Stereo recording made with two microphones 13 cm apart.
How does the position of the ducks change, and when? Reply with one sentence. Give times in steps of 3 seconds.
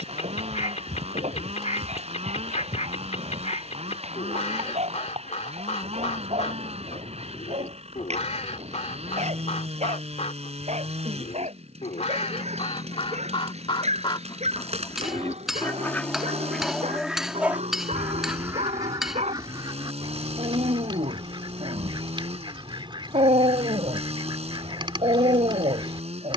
In this clip you hear the ducks on the left from 0 s, in the centre from 15 s and on the right from 18 s.